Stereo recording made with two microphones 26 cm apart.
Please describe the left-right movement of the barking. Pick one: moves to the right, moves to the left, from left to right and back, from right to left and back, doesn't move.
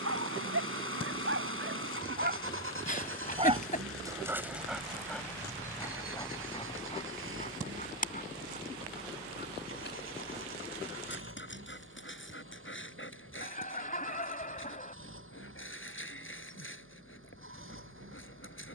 moves to the left.